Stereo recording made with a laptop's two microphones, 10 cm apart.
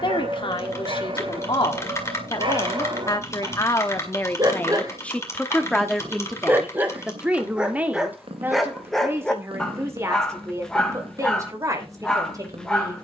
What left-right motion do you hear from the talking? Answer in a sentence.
In this clip you hear the talking move from left to right.